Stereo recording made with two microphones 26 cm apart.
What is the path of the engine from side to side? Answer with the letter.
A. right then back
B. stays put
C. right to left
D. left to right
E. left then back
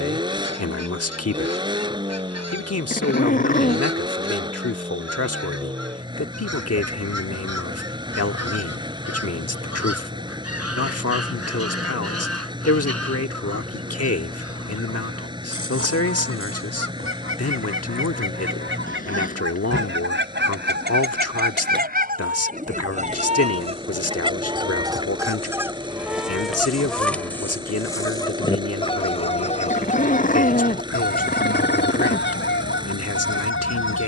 B.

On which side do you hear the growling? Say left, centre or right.
left.